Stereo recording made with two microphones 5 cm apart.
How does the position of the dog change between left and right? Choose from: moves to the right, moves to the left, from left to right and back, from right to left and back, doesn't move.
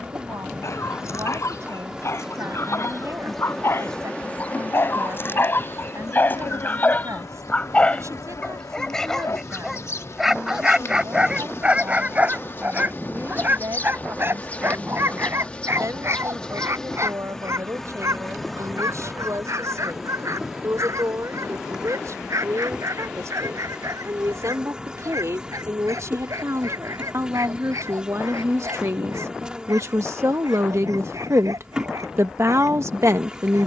moves to the right.